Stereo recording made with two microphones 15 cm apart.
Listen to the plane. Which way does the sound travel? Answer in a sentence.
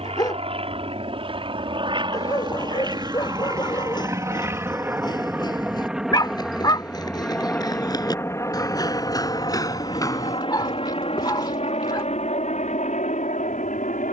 You can hear the plane travel towards the left.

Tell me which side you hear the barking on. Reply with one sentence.
You can hear the barking on the left.